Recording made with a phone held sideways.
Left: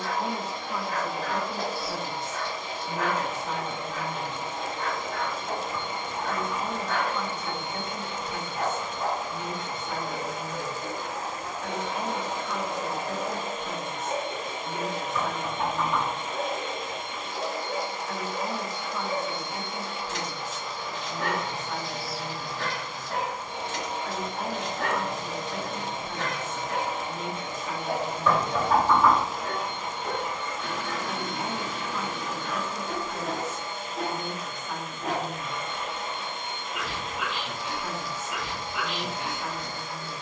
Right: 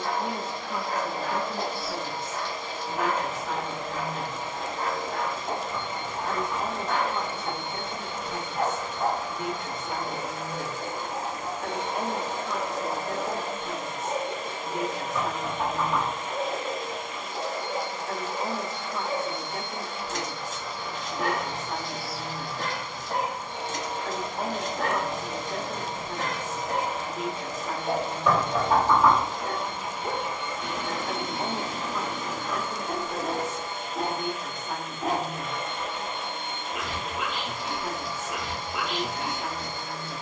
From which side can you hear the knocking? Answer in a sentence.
You can hear the knocking in the centre.